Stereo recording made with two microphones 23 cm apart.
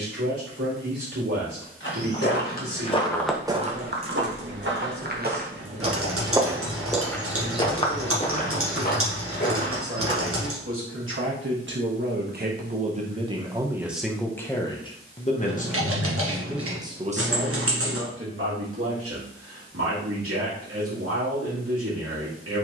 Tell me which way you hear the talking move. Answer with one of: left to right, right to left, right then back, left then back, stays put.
left then back.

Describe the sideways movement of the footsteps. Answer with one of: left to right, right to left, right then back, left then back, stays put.
right then back.